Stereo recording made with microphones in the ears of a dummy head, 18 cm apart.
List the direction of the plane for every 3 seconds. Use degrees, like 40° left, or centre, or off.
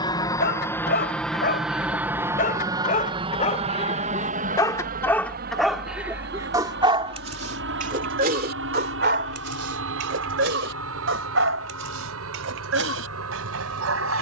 centre, 40° right, 60° right, 70° right, 70° right.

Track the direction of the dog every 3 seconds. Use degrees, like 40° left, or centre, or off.
50° left, 20° left, 30° right, 70° right, 80° right.